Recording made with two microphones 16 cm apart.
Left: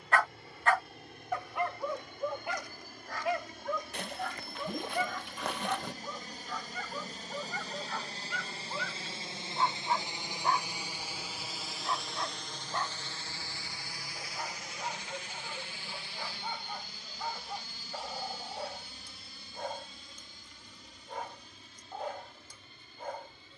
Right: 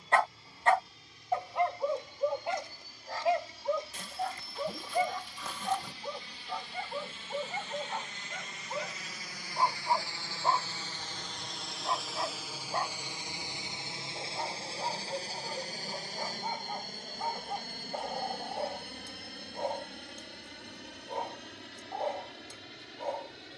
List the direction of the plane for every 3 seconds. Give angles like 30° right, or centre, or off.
60° left, 60° left, 40° left, 20° left, 20° right, 40° right, 60° right, 70° right.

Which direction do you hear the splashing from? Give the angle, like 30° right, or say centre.
70° left.